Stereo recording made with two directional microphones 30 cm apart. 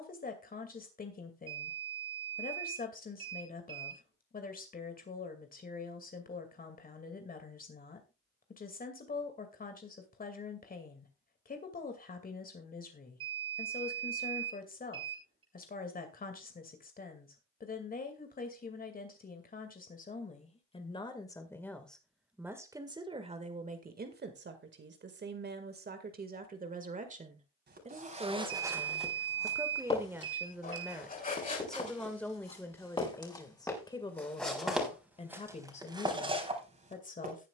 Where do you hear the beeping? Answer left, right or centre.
right.